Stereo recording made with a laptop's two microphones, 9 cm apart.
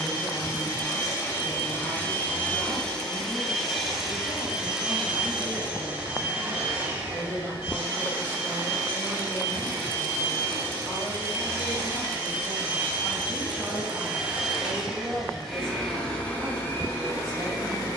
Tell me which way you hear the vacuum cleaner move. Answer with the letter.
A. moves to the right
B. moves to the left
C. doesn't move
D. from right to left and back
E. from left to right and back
E.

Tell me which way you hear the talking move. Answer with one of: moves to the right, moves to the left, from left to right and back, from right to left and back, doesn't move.
moves to the right.